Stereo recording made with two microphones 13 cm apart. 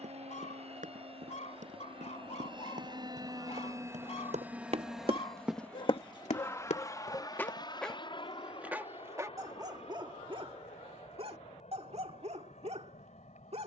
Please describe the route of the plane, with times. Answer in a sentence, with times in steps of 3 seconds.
In this clip you hear the plane on the right from 0 s, in the centre from 3 s and on the left from 6 s.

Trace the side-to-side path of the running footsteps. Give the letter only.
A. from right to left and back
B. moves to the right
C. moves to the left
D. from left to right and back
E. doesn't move
C.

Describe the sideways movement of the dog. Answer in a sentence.
You can hear the dog move from left to right.